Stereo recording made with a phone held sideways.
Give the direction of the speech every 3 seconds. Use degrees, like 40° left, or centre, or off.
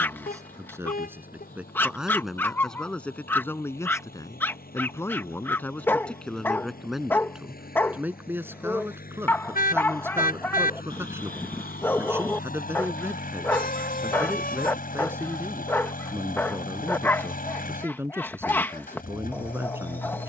10° right, 20° left, 10° right, 20° right, 20° right, 20° right, 20° right.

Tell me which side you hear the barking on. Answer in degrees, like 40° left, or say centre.
10° left.